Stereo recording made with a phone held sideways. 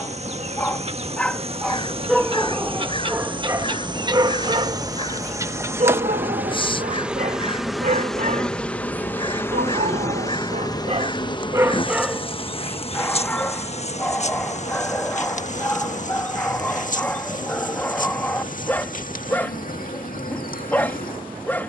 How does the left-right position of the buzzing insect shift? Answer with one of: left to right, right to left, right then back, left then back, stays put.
right to left.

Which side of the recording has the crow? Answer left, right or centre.
left.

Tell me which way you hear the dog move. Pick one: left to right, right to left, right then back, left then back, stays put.
right then back.